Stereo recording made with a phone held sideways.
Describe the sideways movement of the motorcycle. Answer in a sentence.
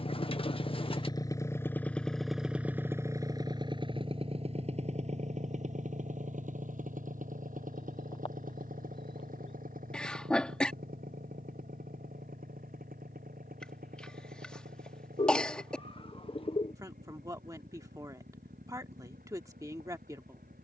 In this clip you hear the motorcycle move to the right.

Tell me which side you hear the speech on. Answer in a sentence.
You can hear the speech on the right.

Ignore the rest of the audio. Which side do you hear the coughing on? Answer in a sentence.
In this clip you hear the coughing in the centre.